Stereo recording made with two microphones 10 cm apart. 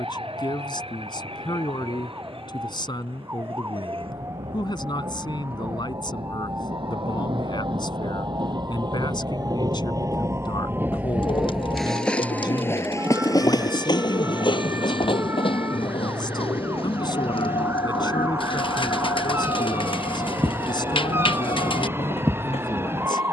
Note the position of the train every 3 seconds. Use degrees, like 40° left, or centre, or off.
70° right, 70° right, 60° right, 20° right, 40° left, 70° left, 80° left, 80° left.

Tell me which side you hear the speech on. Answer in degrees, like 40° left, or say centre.
50° left.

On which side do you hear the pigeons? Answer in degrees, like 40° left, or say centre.
60° left.